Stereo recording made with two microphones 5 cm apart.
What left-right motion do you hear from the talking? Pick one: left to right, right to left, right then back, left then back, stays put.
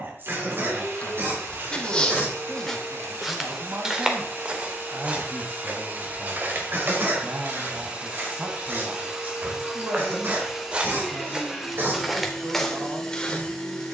stays put.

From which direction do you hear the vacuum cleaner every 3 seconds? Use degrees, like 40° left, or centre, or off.
60° right, 50° right, 30° right, 10° right, 10° left.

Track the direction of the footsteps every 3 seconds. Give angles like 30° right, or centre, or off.
20° left, 20° right, 50° right, 30° right, 10° left.